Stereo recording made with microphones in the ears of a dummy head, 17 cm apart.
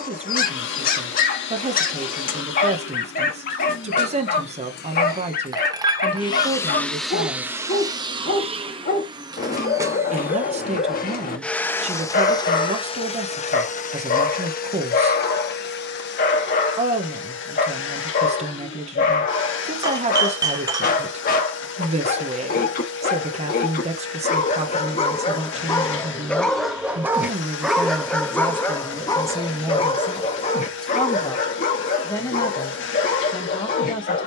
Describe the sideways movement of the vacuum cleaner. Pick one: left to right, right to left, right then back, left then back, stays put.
right then back.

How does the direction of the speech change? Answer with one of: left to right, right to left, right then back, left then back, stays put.
right to left.